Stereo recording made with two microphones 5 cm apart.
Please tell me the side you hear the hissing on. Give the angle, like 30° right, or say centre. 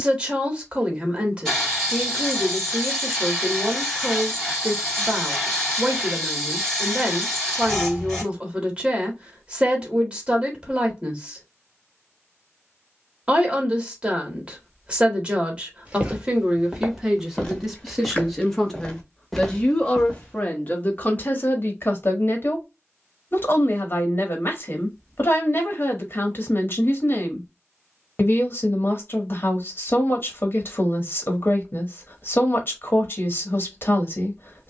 10° left.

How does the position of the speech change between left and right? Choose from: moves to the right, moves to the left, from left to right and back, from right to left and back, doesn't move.
moves to the left.